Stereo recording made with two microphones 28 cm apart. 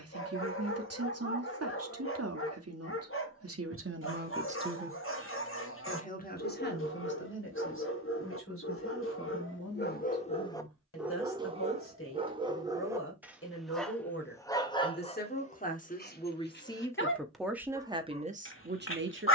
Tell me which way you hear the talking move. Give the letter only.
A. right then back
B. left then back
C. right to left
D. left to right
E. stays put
B.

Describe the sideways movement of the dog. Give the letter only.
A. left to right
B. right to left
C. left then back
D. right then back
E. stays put
D.